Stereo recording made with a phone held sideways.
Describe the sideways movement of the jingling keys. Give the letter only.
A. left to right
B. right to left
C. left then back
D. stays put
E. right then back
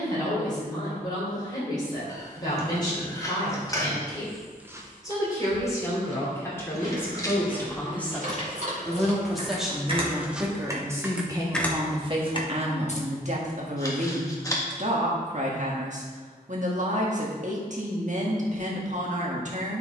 B.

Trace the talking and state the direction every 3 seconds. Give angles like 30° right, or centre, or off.
30° left, 20° left, 10° left, 10° right, 50° right, 50° right, 50° right.